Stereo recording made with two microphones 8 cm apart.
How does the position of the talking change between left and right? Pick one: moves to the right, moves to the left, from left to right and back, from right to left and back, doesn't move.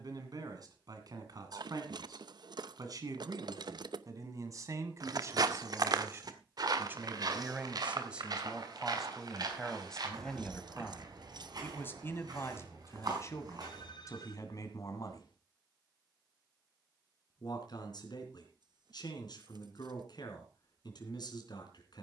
moves to the left.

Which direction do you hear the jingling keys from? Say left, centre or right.
right.